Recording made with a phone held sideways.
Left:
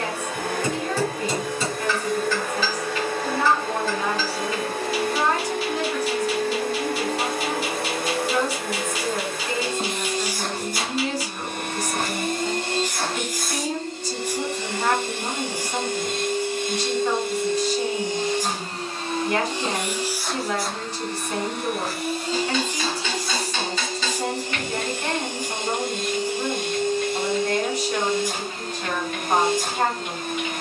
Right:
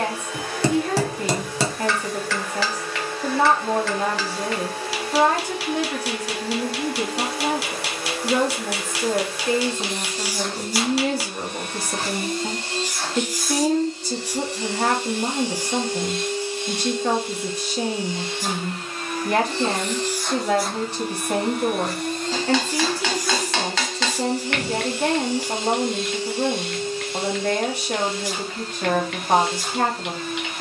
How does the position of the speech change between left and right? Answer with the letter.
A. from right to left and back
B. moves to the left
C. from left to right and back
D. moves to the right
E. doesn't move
E.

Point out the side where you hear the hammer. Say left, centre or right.
right.